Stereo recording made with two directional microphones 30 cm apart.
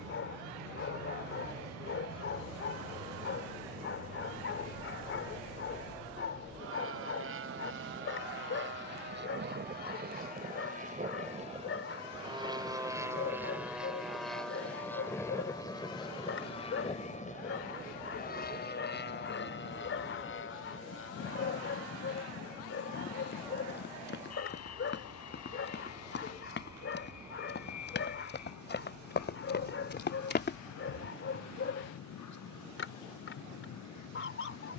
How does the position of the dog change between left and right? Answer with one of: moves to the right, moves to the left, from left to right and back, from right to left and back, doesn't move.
doesn't move.